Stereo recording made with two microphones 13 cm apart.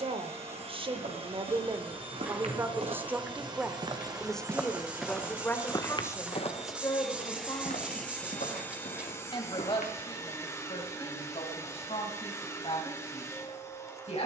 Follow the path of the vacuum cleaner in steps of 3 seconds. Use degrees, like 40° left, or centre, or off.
40° right, 30° right, centre, 20° left, 20° left.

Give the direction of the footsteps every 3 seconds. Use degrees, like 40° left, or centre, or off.
60° right, 10° right, 60° left, 80° left, off.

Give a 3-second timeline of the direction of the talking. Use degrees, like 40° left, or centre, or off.
30° right, 10° left, 30° left, 40° left, 50° left.